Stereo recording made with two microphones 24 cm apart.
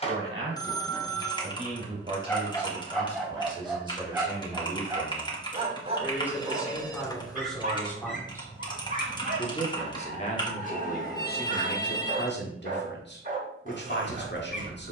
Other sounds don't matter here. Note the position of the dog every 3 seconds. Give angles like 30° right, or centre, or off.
20° left, 10° right, 40° right, 40° right, 40° right.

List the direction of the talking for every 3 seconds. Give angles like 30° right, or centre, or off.
30° right, 20° right, centre, 40° left, 50° left.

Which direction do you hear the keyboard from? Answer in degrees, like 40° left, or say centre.
20° left.